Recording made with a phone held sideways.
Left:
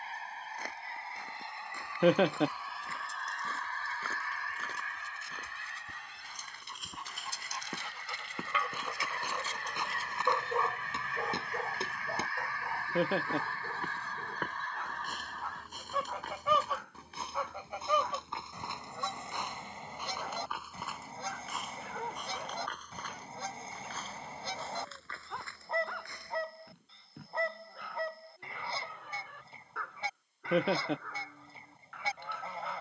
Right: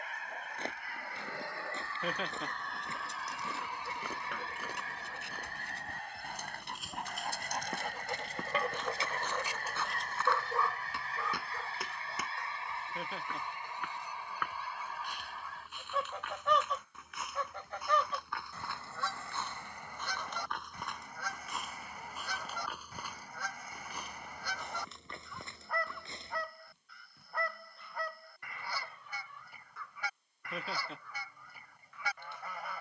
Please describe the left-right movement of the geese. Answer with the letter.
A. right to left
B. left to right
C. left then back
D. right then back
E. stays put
D.